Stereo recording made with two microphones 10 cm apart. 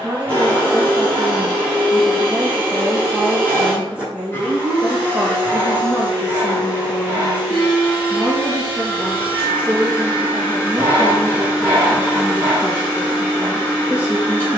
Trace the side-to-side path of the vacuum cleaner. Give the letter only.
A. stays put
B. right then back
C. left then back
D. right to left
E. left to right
A.